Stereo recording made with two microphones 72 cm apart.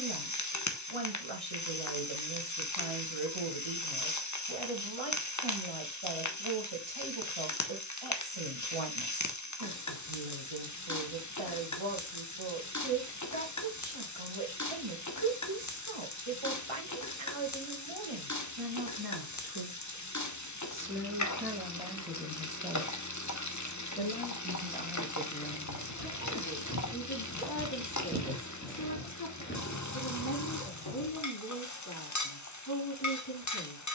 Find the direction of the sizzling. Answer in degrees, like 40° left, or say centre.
30° left.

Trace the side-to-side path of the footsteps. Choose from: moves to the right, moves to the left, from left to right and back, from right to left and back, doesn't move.
moves to the left.